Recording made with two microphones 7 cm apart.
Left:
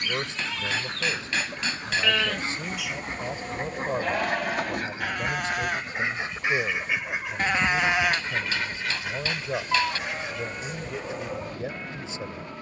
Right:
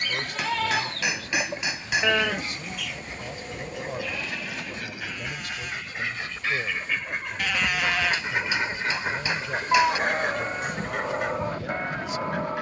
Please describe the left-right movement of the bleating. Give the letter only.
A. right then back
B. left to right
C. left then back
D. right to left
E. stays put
C.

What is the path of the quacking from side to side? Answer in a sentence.
In this clip you hear the quacking move from left to right.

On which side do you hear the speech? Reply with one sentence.
You can hear the speech on the left.